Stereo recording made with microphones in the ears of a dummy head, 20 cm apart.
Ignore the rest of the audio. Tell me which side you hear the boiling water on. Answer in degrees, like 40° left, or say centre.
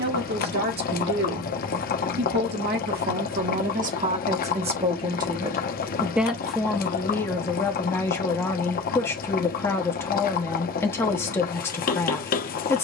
40° left.